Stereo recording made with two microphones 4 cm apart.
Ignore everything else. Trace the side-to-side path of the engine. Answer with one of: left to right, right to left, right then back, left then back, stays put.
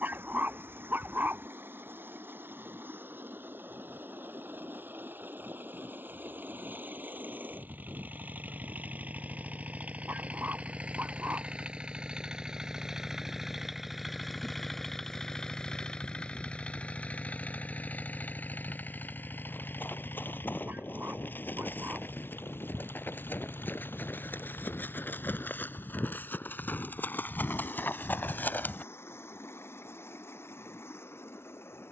right to left.